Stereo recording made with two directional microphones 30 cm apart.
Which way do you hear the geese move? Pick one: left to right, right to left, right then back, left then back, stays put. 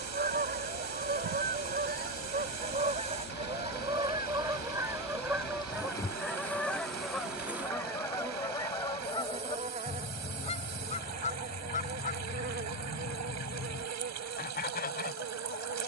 right to left.